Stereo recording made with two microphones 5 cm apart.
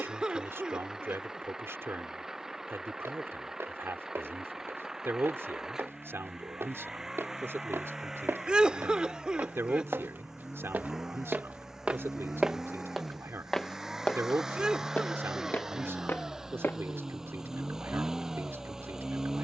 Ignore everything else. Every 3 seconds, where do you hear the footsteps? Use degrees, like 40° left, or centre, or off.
off, 80° right, 70° right, 50° right, centre, 50° left, off.